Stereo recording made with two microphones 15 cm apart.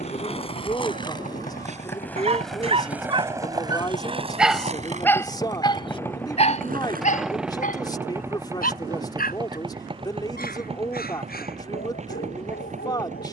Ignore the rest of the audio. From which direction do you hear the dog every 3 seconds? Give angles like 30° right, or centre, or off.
50° right, centre, 60° left, 80° left, 80° left.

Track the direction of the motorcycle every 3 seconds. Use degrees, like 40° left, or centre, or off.
60° left, 30° left, 10° right, 40° right, 50° right.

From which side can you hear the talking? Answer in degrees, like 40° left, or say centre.
30° left.